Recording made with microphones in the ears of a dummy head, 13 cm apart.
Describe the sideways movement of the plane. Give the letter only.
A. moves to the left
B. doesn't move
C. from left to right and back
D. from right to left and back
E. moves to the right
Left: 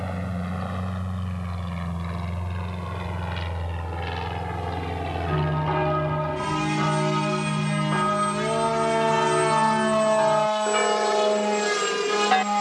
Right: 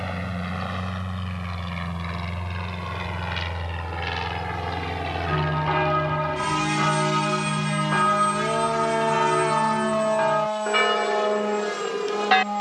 A.